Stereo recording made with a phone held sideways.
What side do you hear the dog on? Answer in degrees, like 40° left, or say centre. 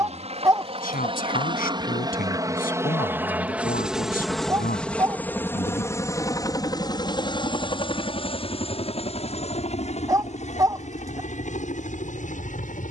20° right.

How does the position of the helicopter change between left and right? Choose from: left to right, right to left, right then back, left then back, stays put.
right to left.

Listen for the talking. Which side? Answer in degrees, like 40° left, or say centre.
60° left.